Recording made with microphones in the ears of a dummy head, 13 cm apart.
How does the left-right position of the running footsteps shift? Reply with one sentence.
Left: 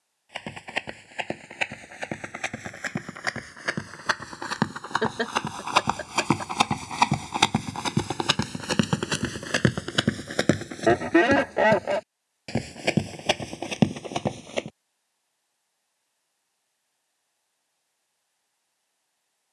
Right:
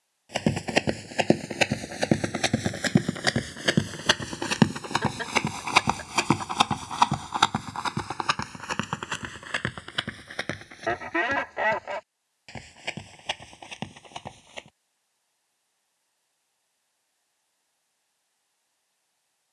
You can hear the running footsteps go from the right side to the left.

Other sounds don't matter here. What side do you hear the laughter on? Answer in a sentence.
You can hear the laughter on the left.